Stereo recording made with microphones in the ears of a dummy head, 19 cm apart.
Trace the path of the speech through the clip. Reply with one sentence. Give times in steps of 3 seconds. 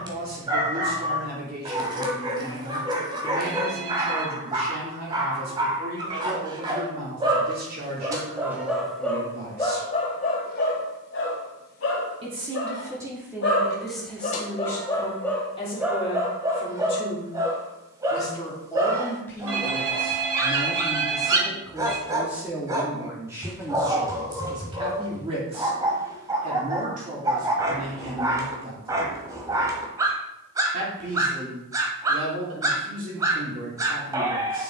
You can hear the speech on the right from 0 s, in the centre from 12 s, on the left from 15 s, in the centre from 18 s and on the right from 24 s.